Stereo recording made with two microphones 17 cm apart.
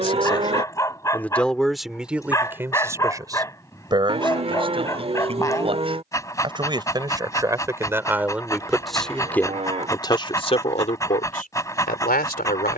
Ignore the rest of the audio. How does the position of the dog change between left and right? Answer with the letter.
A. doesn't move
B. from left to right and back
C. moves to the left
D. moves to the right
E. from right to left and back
A.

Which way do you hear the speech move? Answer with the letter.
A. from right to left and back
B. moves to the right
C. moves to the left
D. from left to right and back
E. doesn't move
D.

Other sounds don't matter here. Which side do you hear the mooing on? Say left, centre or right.
right.